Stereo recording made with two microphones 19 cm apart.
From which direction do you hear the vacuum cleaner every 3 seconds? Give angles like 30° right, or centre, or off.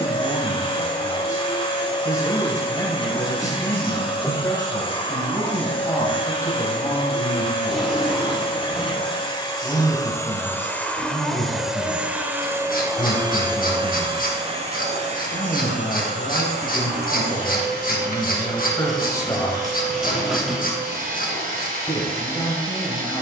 30° left, 30° left, 30° left, 10° left, 20° right, 50° right, 50° right, 50° right.